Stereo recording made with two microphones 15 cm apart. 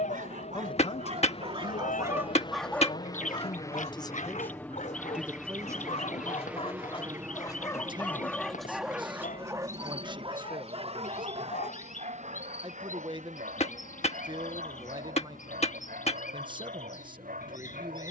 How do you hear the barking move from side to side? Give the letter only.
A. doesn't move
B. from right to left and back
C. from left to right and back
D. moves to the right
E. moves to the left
B.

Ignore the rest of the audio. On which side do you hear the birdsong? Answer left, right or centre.
left.